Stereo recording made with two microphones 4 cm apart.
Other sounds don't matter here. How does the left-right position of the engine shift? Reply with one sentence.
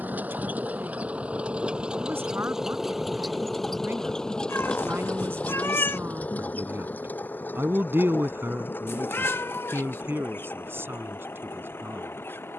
In this clip you hear the engine move from right to left.